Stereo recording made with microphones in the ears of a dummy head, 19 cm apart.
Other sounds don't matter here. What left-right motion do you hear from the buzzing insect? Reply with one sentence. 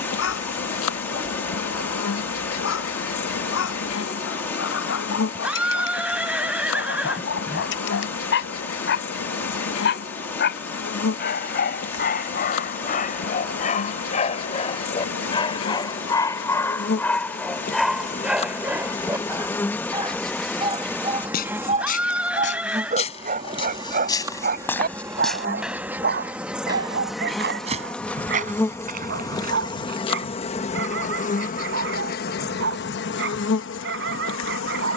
In this clip you hear the buzzing insect go right and come back.